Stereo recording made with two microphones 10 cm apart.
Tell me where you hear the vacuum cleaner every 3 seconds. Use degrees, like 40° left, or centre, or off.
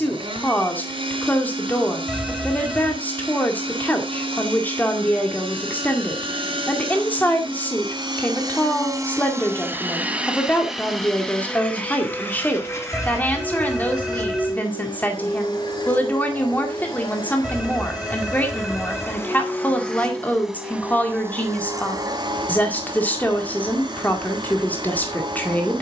60° right, 60° right, 50° right, 10° right, 30° left, 50° left, 20° left, 40° right, 50° right.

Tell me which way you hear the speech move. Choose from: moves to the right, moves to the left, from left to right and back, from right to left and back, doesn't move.
doesn't move.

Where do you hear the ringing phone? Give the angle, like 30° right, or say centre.
centre.